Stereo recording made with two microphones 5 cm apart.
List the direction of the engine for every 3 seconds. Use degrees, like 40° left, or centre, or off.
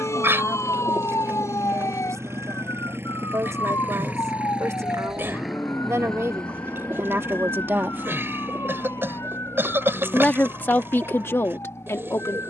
60° right, 20° right, 30° left, 50° left.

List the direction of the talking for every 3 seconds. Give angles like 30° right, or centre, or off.
80° right, 70° right, 50° right, 40° left.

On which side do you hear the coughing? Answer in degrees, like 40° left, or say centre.
50° right.